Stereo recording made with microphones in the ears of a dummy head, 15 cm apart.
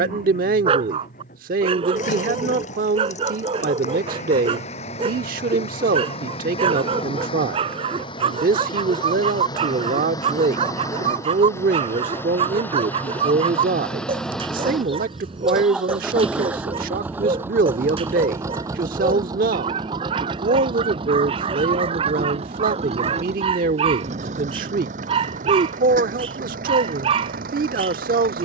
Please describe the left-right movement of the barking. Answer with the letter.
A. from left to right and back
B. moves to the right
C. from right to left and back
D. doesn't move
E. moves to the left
D.